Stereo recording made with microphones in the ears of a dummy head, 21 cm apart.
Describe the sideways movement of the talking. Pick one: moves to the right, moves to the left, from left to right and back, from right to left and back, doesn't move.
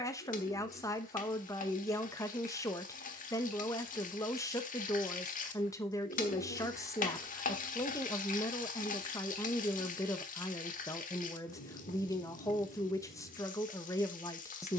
doesn't move.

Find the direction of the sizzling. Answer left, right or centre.
left.